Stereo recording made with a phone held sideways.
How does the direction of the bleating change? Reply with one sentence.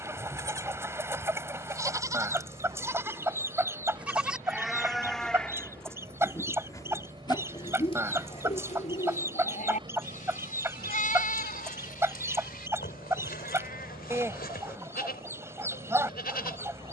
You can hear the bleating move to the left.